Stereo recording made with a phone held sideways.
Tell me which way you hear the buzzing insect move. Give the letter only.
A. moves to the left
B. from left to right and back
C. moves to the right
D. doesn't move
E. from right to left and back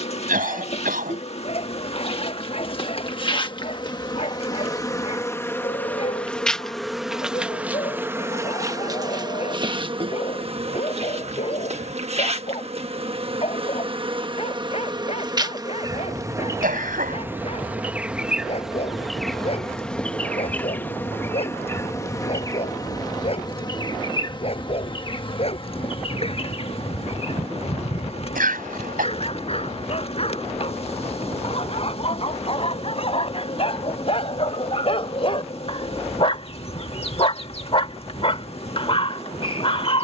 B.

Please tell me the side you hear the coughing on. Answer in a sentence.
In this clip you hear the coughing on the right.